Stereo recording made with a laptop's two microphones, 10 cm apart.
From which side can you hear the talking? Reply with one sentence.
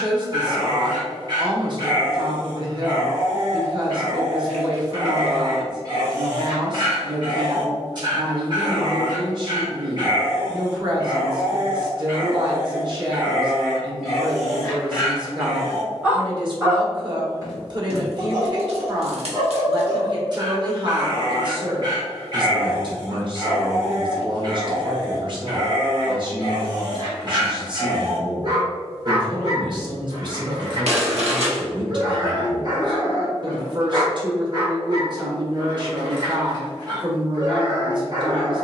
In this clip you hear the talking on the right.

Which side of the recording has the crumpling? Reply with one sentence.
You can hear the crumpling on the right.